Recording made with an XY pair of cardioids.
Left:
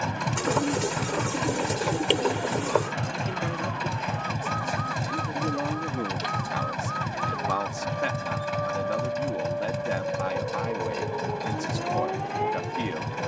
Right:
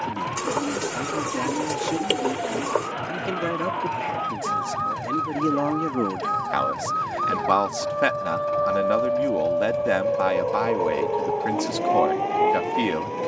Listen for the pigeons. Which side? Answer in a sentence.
In this clip you hear the pigeons in the centre.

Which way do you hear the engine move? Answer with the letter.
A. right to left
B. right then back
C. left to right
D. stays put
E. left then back
D.